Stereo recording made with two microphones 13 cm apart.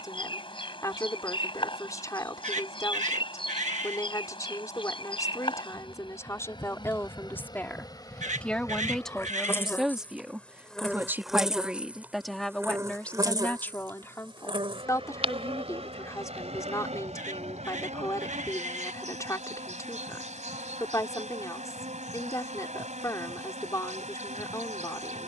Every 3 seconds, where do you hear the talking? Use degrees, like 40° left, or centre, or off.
30° left, 30° left, 20° left, 10° right, 10° left, 20° left, 20° left, 20° left, 20° left.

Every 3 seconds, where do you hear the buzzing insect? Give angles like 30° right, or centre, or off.
40° left, 40° left, 30° left, 10° left, 30° right, 60° right, 70° right, 70° right, 70° right.